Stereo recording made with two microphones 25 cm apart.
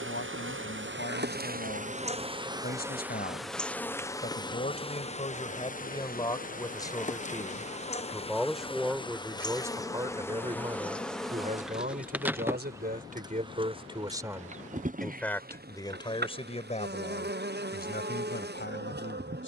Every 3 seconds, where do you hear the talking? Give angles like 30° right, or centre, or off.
40° left, 30° left, 10° left, 20° right, 30° right, 20° left, 40° left.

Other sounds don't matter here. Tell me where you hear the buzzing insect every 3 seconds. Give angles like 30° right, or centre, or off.
30° right, 10° left, 30° left, 10° left, 20° right, 40° right, 40° right.